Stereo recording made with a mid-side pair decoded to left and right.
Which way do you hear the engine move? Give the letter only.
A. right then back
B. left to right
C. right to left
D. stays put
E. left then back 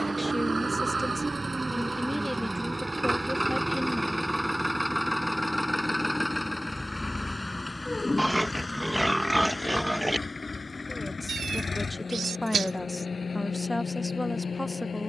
C.